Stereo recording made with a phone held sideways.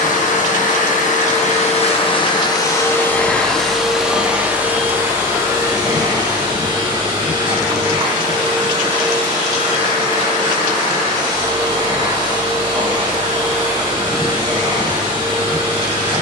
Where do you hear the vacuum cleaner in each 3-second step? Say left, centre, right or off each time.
left, centre, right, right, right, right.